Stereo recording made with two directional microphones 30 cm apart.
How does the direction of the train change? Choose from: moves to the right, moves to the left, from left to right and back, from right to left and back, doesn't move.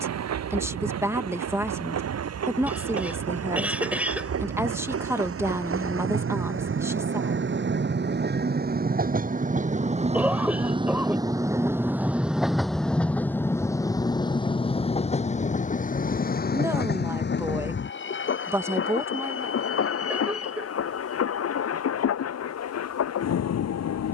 moves to the left.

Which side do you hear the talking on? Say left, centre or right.
centre.